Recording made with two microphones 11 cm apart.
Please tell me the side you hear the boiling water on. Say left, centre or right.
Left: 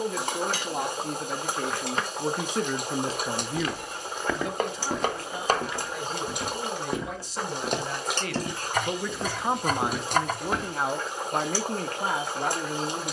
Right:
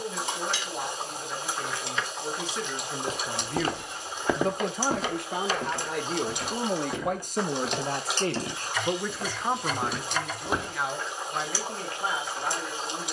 left.